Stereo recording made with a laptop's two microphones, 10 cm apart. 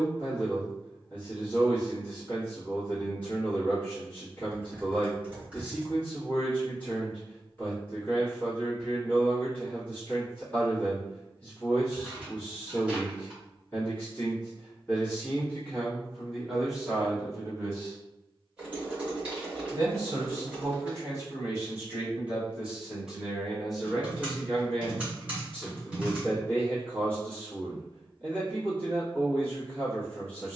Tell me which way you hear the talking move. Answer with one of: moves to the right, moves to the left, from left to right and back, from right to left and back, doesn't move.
from left to right and back.